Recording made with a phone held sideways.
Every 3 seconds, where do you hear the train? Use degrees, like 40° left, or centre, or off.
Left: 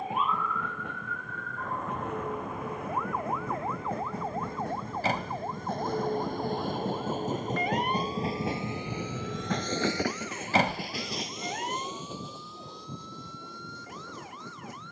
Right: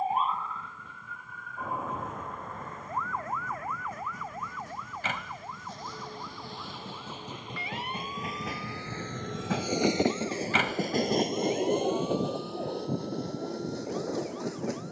70° left, 60° left, 40° left, 30° right, 70° right.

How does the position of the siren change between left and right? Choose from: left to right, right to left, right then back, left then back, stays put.
right to left.